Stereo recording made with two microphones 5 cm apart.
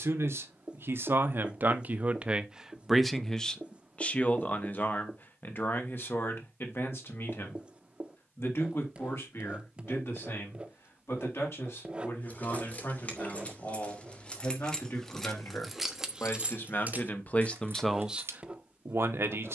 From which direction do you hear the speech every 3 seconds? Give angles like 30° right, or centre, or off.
40° right, 30° left, 60° left, 70° left, 70° left, 40° left, 50° right.